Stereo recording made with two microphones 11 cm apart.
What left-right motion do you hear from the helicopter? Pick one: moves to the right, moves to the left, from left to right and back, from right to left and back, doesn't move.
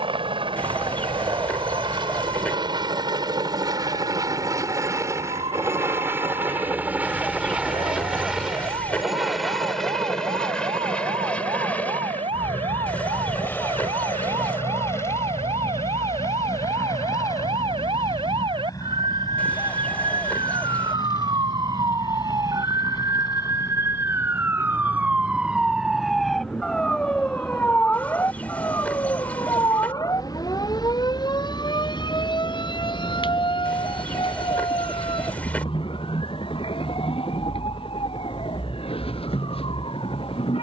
moves to the left.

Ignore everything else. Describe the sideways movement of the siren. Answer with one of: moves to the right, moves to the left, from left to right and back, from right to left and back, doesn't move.
moves to the left.